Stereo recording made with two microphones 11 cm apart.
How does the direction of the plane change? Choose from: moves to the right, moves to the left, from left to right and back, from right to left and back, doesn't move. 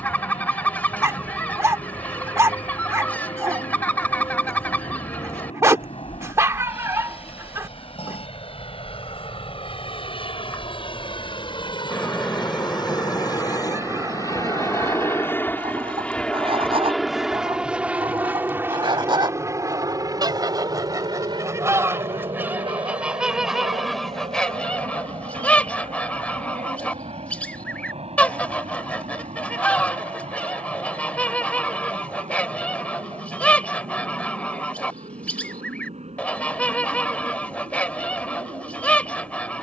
moves to the right.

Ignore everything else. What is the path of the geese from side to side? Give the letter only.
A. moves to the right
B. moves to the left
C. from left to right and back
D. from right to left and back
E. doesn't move
C.